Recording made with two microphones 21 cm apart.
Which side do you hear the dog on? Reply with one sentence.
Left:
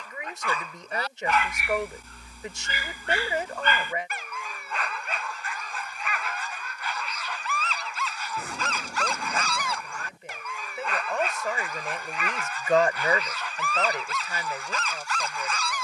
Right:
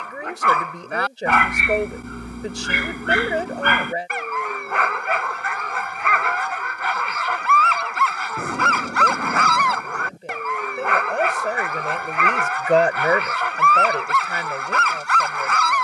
You can hear the dog on the right.